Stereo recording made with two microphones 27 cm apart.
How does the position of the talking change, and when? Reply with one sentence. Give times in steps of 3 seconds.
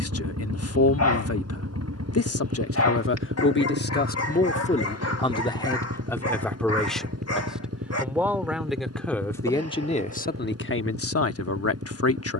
You can hear the talking on the left from 0 s, in the centre from 6 s and on the left from 9 s.